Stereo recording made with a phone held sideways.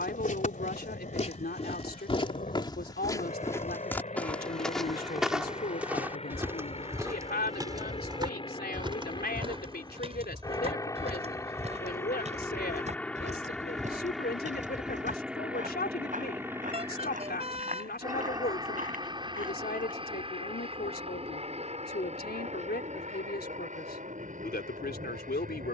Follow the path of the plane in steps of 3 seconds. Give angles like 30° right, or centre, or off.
50° left, 40° left, 30° left, 20° left, centre, 10° right, 30° right, 40° right, 50° right.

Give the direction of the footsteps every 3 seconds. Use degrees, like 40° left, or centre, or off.
40° left, 10° left, 20° right, 40° right, 40° right, 50° right, 50° right, off, off.